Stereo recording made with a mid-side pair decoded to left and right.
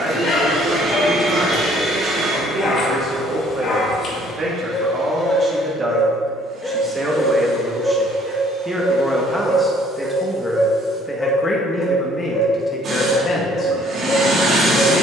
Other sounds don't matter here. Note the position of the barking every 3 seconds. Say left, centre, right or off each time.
left, left, centre, centre, left.